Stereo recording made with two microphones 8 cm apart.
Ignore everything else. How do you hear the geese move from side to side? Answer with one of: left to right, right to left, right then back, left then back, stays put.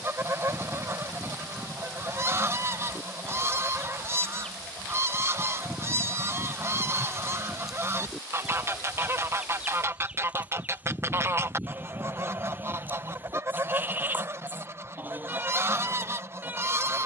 stays put.